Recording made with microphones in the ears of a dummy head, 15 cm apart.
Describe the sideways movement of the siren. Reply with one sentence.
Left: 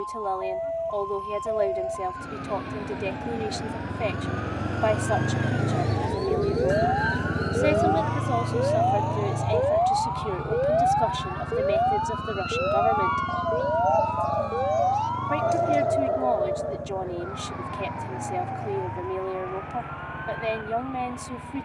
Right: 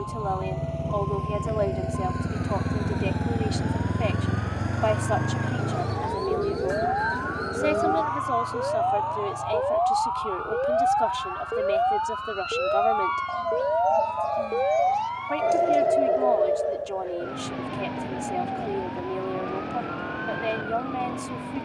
In this clip you hear the siren move from left to right.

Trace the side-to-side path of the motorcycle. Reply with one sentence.
In this clip you hear the motorcycle move to the left.